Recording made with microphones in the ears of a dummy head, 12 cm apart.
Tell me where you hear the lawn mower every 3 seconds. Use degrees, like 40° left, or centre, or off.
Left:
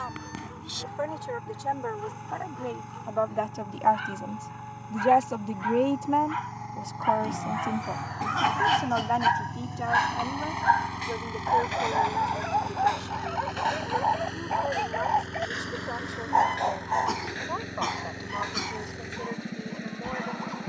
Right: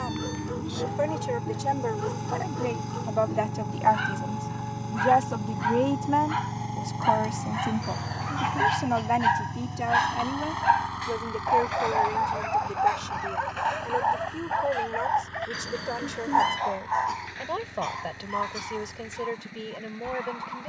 40° right, 40° right, 20° right, 10° left, 40° left, 50° left, 60° left.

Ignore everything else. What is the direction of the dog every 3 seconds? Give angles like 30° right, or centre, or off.
60° right, 50° right, 40° right, 20° right, centre, 30° left, 40° left.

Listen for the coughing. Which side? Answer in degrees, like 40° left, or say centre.
70° left.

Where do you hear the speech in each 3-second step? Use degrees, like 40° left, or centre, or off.
20° right, centre, centre, 10° right, 20° right, 30° right, 30° right.